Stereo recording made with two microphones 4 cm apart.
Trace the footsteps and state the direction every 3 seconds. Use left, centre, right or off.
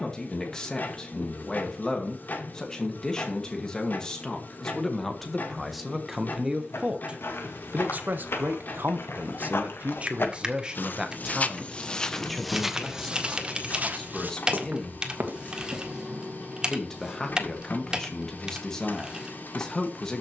off, off, left, left, right, right, off.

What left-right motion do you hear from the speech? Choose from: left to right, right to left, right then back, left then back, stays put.
right then back.